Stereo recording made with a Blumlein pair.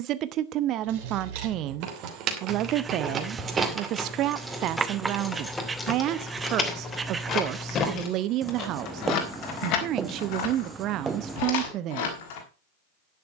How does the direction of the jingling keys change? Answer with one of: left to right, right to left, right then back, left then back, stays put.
right to left.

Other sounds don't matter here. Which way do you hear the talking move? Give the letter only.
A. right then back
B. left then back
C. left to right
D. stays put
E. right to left
D.